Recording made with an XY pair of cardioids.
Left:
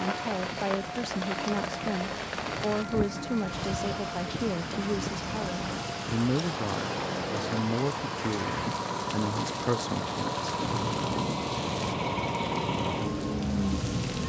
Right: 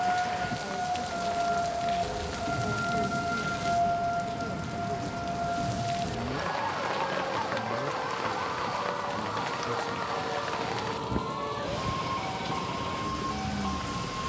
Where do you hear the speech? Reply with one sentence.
In this clip you hear the speech on the left.